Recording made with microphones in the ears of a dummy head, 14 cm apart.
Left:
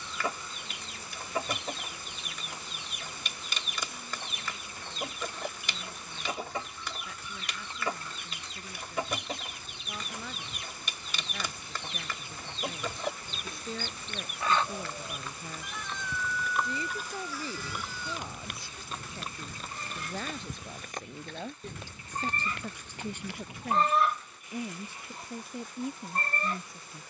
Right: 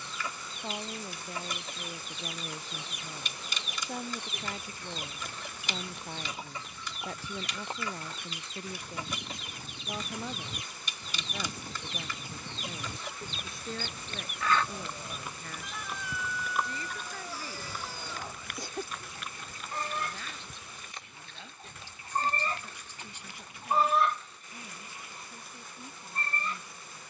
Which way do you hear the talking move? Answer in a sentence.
You can hear the talking move from right to left.